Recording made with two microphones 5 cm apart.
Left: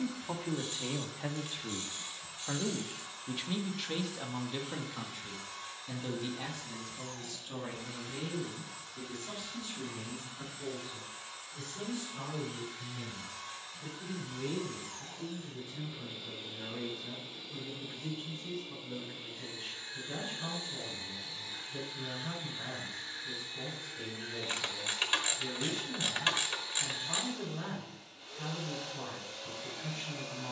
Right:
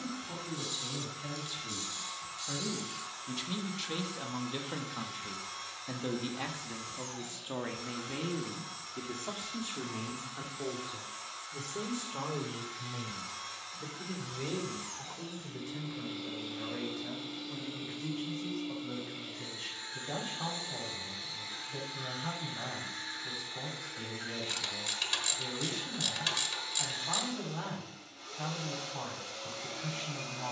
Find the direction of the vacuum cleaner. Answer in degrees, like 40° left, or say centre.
90° right.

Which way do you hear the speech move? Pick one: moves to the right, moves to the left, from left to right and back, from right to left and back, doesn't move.
moves to the right.